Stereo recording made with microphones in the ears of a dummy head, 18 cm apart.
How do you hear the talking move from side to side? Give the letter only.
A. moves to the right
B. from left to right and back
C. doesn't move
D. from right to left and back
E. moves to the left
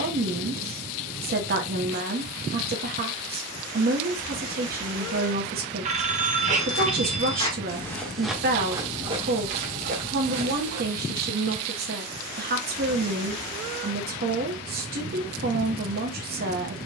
C.